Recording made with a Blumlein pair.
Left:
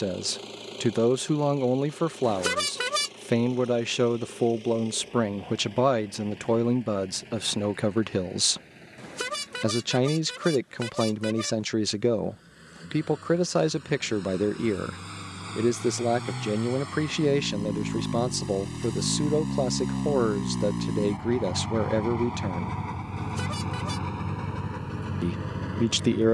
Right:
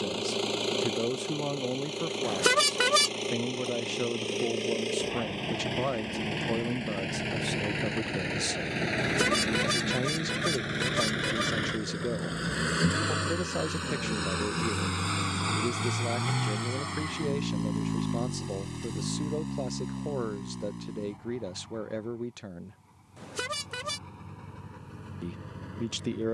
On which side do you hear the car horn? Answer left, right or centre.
centre.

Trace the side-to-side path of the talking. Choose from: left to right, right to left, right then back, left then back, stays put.
stays put.